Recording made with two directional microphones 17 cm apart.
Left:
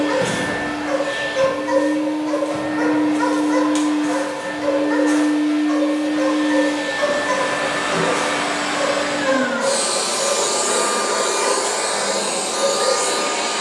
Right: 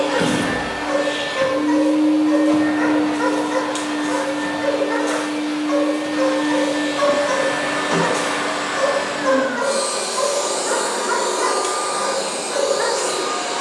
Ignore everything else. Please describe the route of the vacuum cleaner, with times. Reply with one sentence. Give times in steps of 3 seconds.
In this clip you hear the vacuum cleaner on the right from 0 s, in the centre from 6 s and on the left from 9 s.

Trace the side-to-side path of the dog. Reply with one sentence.
In this clip you hear the dog travel towards the right.